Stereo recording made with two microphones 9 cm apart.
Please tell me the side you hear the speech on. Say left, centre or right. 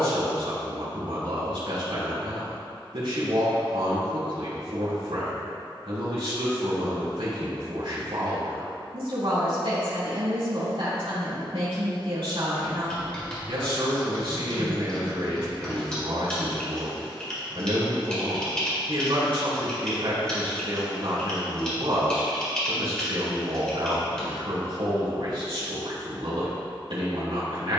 right.